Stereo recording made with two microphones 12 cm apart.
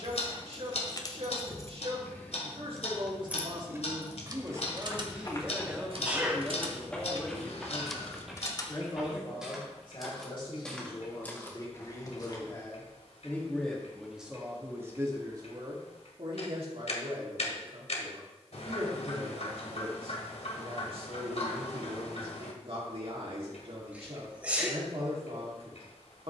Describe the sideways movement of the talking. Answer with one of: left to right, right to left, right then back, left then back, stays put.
left then back.